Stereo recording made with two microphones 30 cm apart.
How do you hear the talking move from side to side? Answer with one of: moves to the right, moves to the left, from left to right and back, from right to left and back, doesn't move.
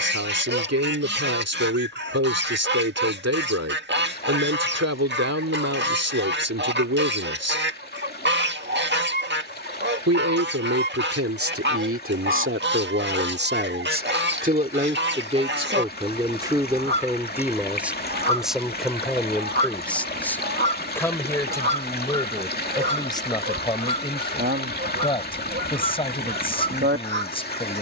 moves to the left.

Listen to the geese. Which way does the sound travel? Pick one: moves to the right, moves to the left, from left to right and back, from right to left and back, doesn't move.
doesn't move.